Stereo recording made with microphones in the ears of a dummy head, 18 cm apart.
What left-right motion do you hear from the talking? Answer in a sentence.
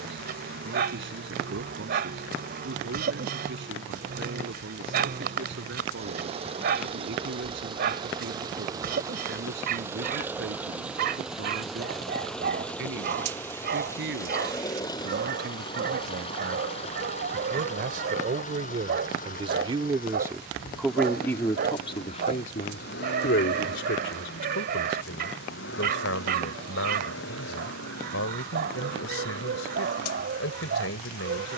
You can hear the talking move from right to left.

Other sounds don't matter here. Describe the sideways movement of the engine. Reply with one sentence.
In this clip you hear the engine move to the left.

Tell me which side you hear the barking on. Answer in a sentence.
You can hear the barking on the right.